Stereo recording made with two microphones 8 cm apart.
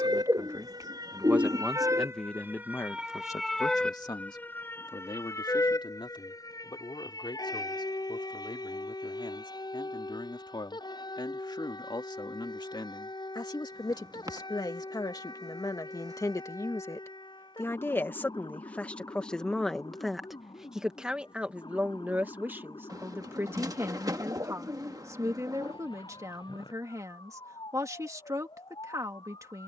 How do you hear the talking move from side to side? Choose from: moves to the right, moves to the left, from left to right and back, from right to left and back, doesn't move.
from right to left and back.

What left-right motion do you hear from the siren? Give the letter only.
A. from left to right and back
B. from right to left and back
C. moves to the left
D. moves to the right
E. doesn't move
C.